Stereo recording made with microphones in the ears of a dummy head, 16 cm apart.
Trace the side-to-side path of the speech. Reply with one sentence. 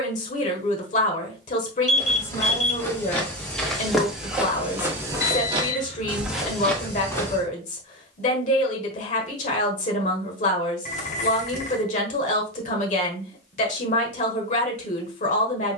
In this clip you hear the speech stay put.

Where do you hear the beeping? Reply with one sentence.
You can hear the beeping on the left.